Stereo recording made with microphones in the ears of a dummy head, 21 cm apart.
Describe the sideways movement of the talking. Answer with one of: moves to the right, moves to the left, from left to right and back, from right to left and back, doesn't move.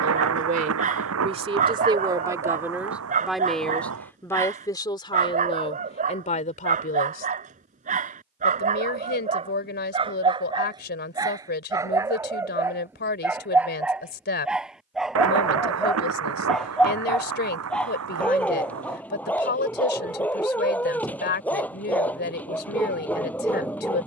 moves to the left.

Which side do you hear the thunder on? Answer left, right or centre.
right.